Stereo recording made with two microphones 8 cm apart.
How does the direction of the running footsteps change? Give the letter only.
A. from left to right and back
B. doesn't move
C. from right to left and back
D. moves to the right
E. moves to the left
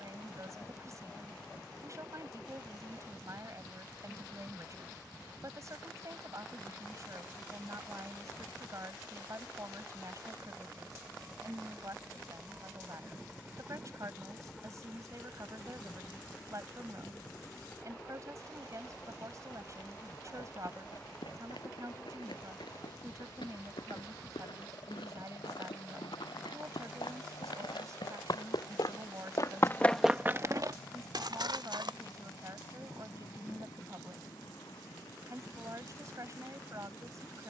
D.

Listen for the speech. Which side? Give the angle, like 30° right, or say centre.
40° right.